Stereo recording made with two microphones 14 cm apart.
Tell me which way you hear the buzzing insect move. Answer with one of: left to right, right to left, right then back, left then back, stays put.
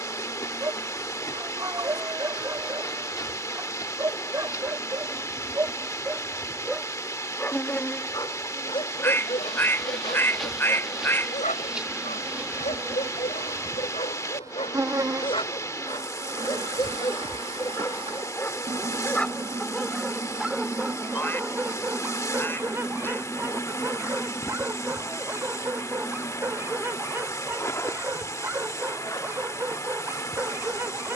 right then back.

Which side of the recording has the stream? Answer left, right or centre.
left.